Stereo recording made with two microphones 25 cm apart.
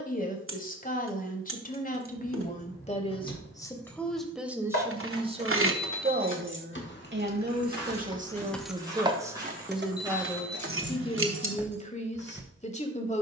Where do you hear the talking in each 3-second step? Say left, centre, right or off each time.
left, centre, right, centre, left.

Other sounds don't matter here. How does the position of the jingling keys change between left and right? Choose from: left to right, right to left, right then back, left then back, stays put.
left to right.